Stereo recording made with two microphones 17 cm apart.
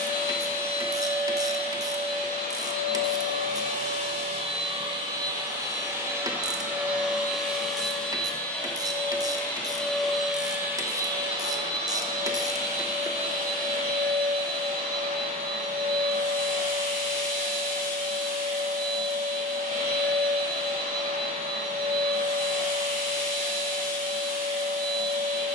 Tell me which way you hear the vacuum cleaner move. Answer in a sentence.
You can hear the vacuum cleaner go left and come back.